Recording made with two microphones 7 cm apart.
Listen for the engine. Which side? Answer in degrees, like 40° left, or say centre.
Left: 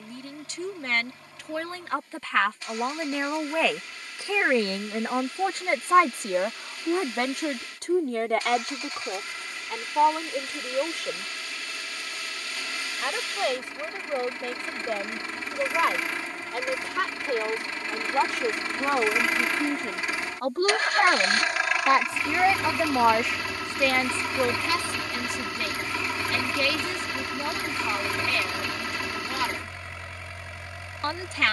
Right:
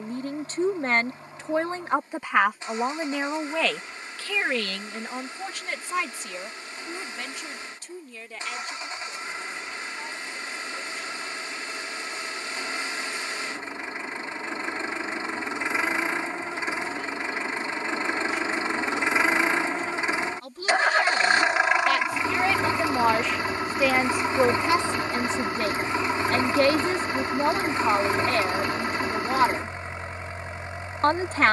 30° right.